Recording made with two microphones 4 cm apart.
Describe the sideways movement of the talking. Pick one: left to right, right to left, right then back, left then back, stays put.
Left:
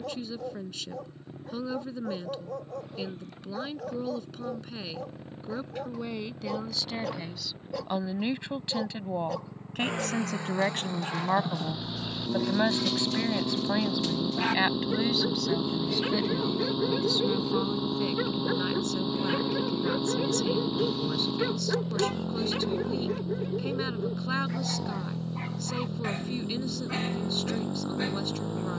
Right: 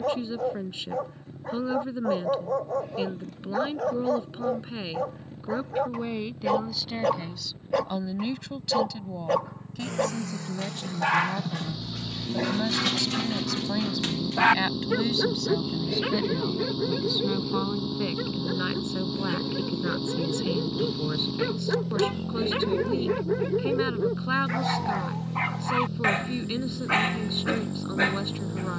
left then back.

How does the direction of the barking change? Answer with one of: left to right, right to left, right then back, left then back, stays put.
left then back.